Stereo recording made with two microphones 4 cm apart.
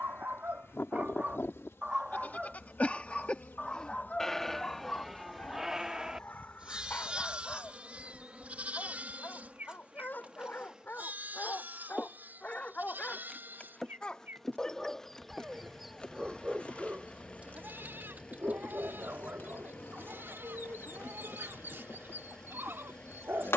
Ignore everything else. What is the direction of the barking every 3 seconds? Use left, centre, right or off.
right, left, left, left, left, centre, right, right.